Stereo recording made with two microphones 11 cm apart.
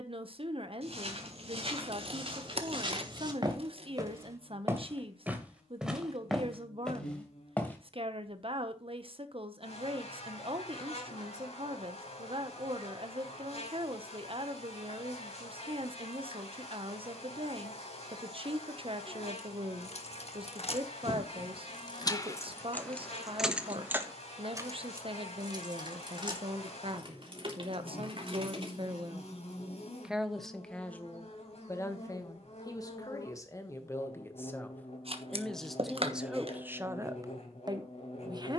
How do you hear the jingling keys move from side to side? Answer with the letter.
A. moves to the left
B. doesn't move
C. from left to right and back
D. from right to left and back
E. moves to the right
E.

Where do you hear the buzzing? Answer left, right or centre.
left.